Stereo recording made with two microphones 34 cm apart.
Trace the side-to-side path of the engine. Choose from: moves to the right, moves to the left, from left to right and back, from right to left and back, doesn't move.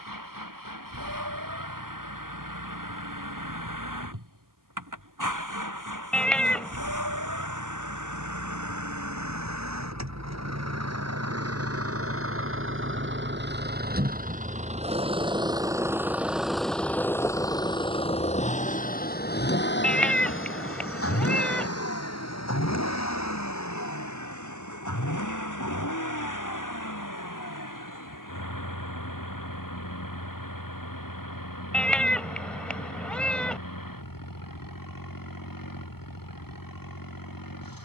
moves to the left.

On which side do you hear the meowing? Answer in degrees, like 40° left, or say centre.
centre.